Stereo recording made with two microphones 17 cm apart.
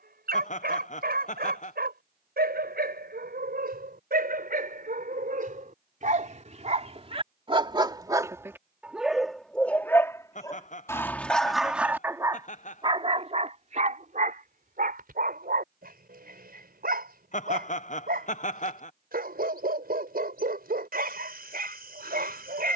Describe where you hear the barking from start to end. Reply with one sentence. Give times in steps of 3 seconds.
In this clip you hear the barking on the right from 0 s, in the centre from 9 s and on the right from 12 s.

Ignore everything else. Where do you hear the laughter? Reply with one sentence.
In this clip you hear the laughter on the left.